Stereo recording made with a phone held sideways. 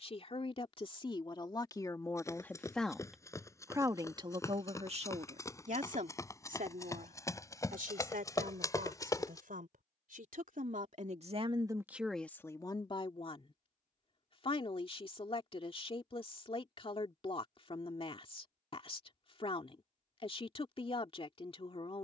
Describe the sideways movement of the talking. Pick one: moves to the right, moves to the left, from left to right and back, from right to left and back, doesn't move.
from left to right and back.